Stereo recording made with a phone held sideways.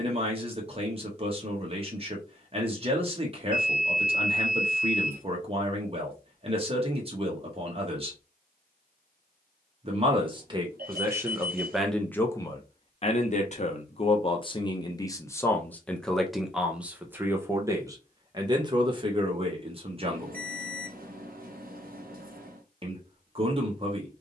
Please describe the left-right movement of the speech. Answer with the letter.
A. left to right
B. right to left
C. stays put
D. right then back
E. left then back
E.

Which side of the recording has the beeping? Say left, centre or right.
right.